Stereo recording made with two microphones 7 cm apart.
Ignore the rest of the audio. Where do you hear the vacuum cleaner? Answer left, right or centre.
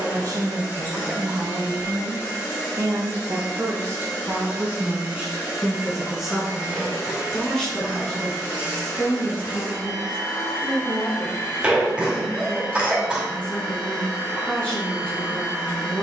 left.